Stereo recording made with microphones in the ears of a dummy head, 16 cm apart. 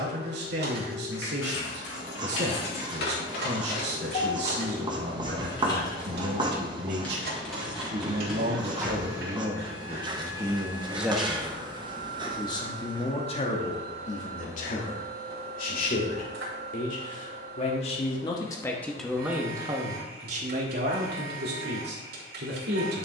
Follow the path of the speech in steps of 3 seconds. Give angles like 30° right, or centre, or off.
70° right, 70° right, 60° right, 20° right, 40° left, 50° left, 10° right, 60° right.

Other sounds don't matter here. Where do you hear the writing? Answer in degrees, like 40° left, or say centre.
30° right.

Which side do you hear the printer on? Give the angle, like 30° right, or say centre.
70° right.